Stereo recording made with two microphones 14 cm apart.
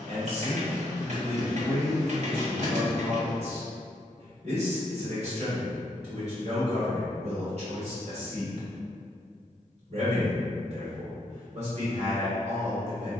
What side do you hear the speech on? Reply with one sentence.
You can hear the speech on the right.